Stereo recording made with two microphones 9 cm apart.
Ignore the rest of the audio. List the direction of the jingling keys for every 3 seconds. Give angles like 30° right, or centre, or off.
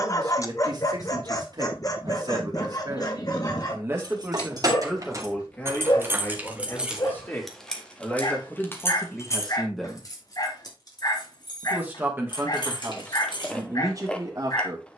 off, 40° right, centre, 50° left, 60° left.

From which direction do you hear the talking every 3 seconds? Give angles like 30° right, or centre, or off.
50° right, 10° right, 20° left, centre, 30° right.